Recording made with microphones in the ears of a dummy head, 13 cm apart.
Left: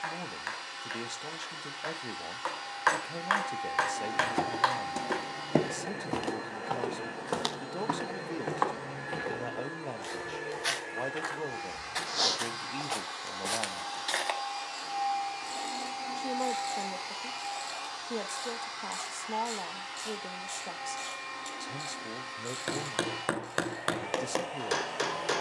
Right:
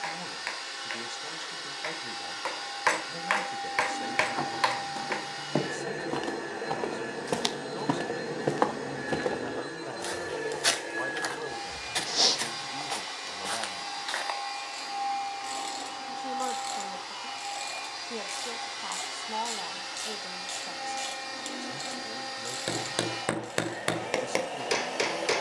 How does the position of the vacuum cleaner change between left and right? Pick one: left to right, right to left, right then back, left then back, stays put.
left then back.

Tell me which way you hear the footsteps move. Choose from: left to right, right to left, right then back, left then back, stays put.
right then back.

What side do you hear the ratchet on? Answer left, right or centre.
right.